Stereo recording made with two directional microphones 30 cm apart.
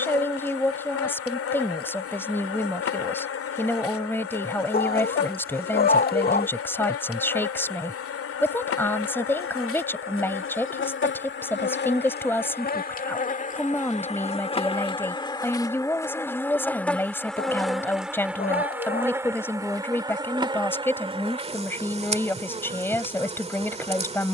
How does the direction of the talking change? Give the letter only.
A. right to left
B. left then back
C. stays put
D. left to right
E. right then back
C.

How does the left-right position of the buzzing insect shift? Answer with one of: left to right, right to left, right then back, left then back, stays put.
left to right.